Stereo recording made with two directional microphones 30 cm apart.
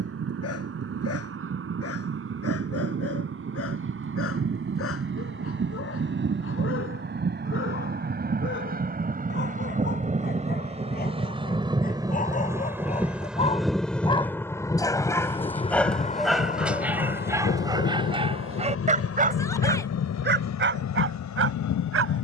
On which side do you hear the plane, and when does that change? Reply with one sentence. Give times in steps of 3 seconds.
You can hear the plane on the right from 0 s, in the centre from 12 s and on the left from 15 s.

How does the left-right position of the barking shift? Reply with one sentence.
In this clip you hear the barking move from left to right.